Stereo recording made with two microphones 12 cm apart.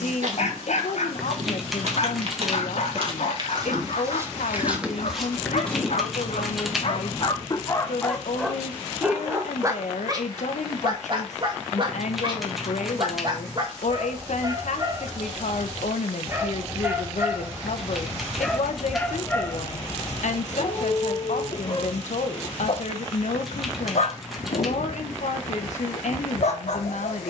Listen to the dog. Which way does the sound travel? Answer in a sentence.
You can hear the dog move from left to right and back again.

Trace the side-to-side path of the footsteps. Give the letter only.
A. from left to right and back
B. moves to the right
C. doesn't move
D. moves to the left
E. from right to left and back
D.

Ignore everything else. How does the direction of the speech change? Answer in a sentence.
You can hear the speech stay in one place.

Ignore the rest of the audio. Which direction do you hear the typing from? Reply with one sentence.
You can hear the typing in the centre.